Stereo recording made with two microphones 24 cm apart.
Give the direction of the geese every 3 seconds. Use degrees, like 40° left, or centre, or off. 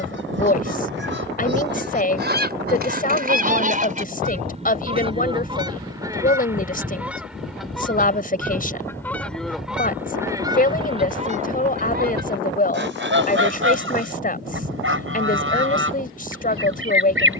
50° right, 30° right, centre, 20° right, 50° right, 60° right.